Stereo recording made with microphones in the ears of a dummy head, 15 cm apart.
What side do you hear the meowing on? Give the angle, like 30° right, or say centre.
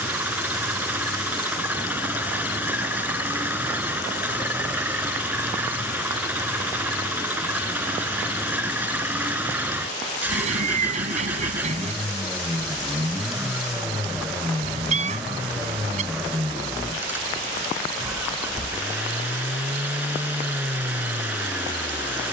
40° right.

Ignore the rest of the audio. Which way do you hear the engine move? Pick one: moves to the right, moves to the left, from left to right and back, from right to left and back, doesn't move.
doesn't move.